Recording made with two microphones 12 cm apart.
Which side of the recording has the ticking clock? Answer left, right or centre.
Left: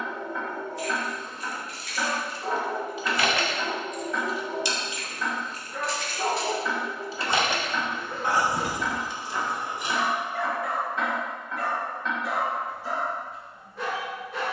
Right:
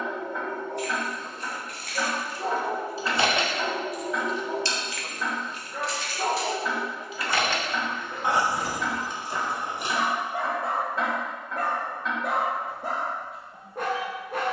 centre.